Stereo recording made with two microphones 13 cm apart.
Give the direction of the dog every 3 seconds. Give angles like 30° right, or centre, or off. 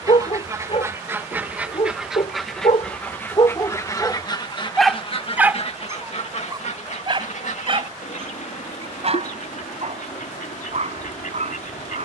50° left, 10° left, 40° right, 60° right.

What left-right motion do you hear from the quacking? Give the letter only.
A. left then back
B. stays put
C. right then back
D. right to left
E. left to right
D.